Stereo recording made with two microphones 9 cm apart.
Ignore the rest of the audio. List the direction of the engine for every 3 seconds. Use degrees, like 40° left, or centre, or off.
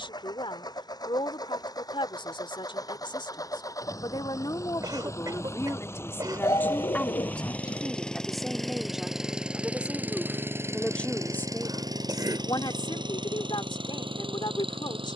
50° left, 40° left, 10° left, 30° right, 60° right.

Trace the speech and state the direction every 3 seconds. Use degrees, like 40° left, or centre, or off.
70° left, 50° left, 10° left, centre, 60° left.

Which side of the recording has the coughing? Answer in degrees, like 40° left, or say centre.
50° right.